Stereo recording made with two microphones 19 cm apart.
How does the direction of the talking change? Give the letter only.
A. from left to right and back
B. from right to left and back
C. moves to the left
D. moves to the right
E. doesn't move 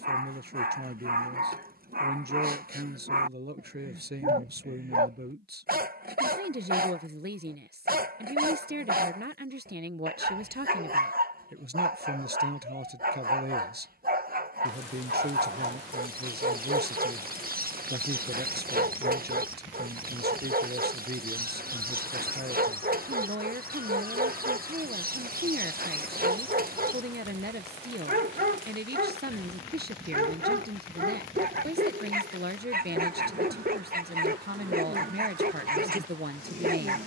E.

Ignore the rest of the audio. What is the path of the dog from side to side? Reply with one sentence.
You can hear the dog stay in one place.